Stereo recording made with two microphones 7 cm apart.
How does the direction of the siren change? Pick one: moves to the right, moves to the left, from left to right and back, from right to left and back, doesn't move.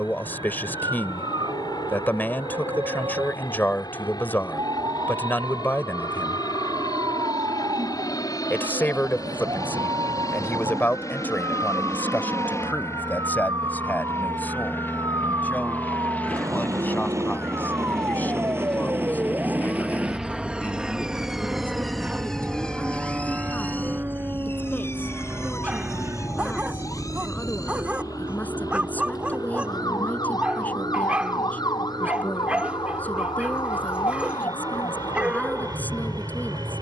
moves to the left.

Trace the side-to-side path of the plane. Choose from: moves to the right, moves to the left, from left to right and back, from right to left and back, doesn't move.
moves to the right.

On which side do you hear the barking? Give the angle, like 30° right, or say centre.
20° right.